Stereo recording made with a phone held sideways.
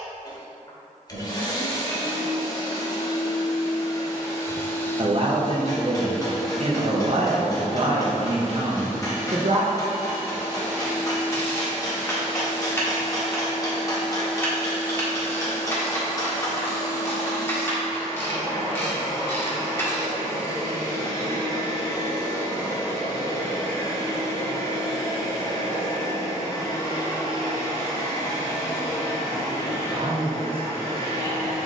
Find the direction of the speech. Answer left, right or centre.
right.